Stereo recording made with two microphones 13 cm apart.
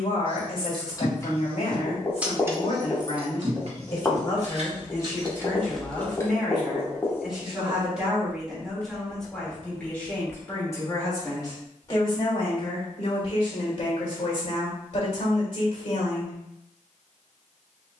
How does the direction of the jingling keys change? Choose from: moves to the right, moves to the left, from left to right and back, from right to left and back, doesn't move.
from left to right and back.